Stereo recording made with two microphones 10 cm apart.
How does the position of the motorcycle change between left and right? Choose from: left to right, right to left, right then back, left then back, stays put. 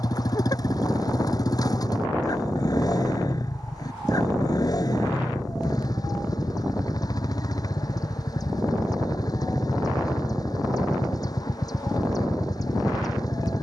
stays put.